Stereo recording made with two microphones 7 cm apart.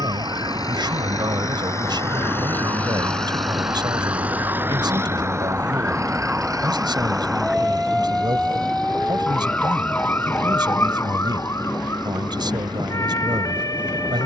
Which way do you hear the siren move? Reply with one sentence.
In this clip you hear the siren move from right to left.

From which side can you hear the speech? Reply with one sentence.
In this clip you hear the speech on the right.